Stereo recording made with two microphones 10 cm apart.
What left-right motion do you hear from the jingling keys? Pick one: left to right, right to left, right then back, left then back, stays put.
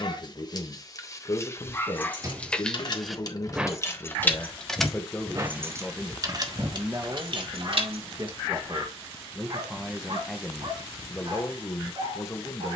left to right.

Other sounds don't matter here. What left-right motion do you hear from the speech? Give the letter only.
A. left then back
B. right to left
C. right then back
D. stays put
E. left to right
C.